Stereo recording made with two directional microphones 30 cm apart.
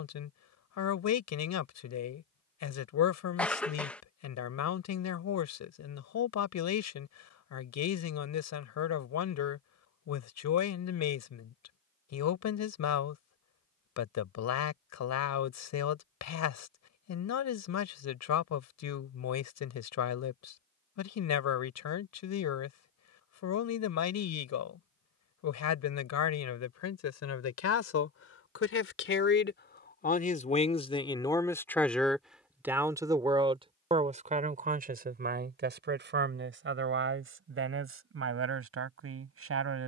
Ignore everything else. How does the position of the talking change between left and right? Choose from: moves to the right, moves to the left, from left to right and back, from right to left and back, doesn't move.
moves to the right.